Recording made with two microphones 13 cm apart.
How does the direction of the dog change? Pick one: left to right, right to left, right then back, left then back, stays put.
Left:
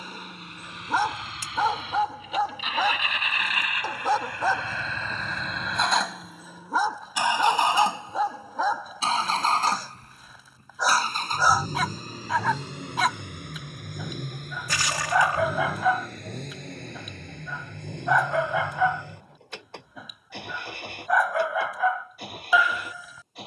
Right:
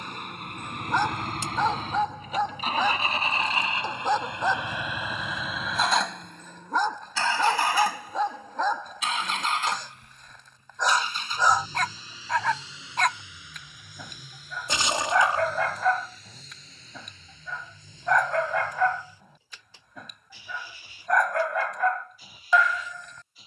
stays put.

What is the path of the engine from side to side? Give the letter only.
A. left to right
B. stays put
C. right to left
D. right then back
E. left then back
C.